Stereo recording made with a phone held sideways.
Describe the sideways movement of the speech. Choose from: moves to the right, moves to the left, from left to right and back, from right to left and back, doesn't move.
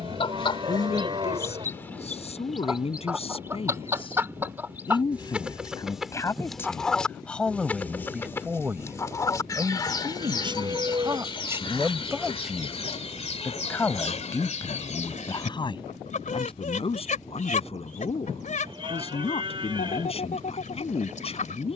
from left to right and back.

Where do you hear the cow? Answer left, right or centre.
right.